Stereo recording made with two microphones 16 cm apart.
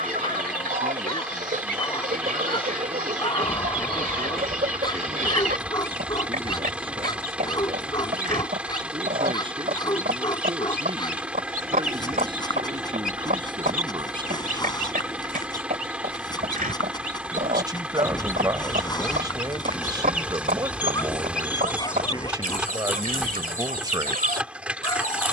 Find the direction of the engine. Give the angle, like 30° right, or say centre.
10° right.